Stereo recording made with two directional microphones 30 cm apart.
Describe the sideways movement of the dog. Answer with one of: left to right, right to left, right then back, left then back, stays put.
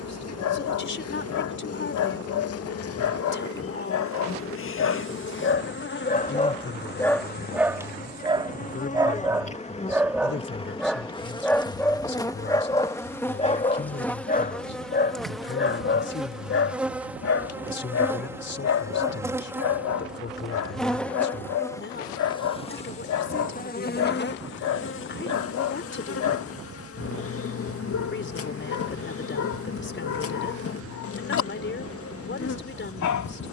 right then back.